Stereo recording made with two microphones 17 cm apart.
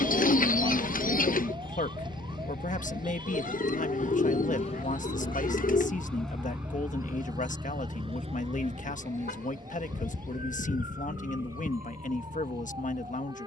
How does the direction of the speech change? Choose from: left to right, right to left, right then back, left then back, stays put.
stays put.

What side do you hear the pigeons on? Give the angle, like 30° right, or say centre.
60° left.